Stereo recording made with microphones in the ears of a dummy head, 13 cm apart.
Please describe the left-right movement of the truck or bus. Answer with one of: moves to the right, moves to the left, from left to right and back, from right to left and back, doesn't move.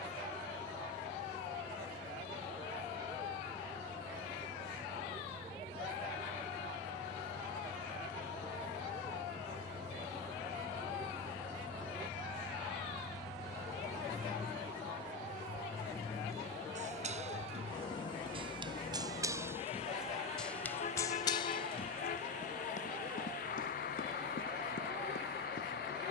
moves to the left.